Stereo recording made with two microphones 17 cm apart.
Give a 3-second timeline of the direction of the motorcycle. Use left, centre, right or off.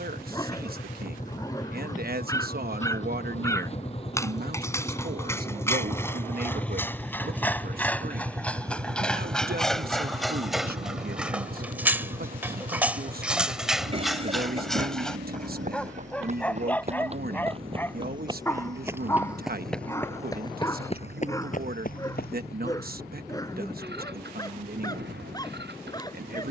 left, left, centre, right, right, right, right, right, right.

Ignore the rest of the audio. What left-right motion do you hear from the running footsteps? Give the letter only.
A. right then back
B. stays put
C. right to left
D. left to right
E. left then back
C.